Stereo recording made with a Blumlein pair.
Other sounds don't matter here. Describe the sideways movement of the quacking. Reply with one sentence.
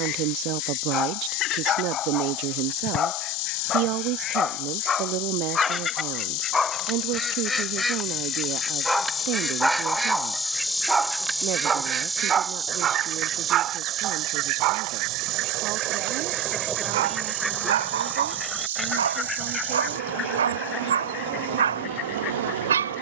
You can hear the quacking move from left to right and back again.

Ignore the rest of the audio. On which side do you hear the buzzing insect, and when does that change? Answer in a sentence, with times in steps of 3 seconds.
In this clip you hear the buzzing insect on the left from 0 s, in the centre from 9 s and on the right from 12 s.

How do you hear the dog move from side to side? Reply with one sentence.
In this clip you hear the dog move to the right.